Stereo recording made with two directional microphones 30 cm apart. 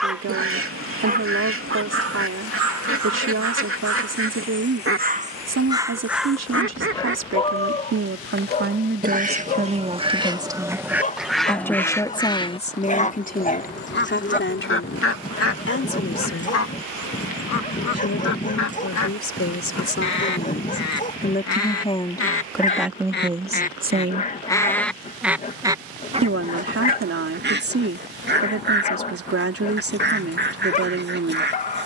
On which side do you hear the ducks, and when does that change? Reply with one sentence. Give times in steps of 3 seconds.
In this clip you hear the ducks on the right from 0 s, in the centre from 9 s, on the left from 12 s, in the centre from 24 s and on the right from 27 s.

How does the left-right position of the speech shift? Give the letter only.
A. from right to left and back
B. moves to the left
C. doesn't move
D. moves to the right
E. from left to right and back
A.